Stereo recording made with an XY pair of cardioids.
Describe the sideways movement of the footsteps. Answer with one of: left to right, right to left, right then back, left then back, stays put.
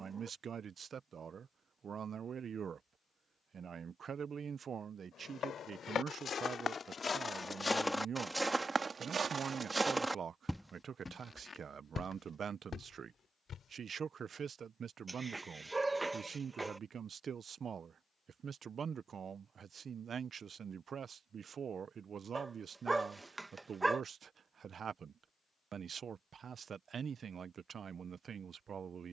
right then back.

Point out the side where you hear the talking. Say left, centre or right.
right.